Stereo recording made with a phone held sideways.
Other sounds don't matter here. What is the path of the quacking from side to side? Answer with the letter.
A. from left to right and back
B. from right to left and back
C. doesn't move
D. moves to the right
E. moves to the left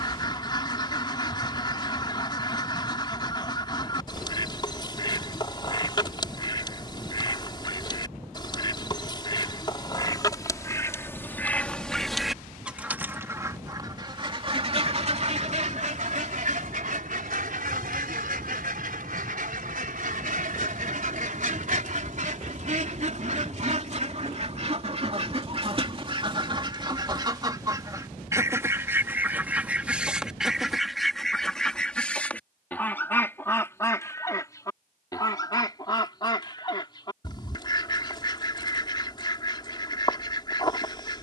A.